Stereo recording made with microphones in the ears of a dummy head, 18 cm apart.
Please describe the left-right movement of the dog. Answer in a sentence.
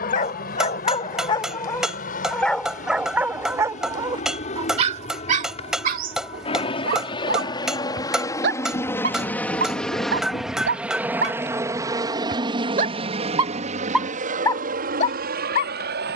You can hear the dog move from left to right and back again.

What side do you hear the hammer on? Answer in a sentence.
In this clip you hear the hammer in the centre.